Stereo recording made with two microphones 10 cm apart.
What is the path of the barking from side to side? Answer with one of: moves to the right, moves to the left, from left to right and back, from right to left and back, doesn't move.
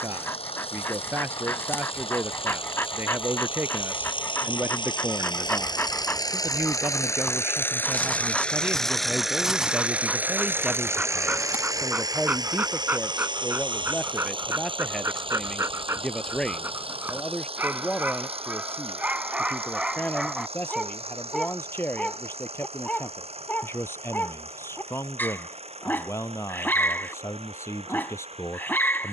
from left to right and back.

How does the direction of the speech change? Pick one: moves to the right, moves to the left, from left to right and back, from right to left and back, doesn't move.
moves to the left.